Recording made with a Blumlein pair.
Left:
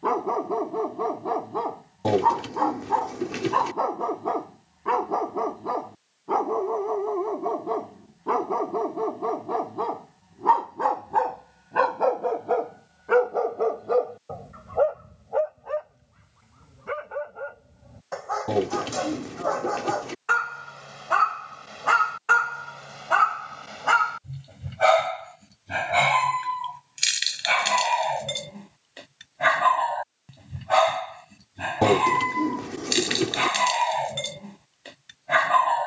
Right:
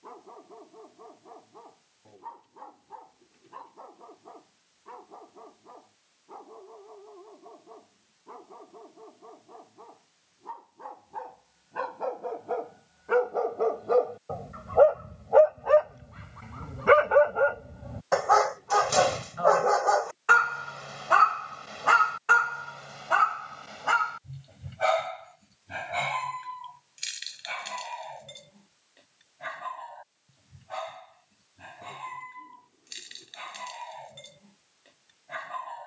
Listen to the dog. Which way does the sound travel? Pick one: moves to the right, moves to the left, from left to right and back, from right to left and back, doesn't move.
from left to right and back.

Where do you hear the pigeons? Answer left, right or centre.
left.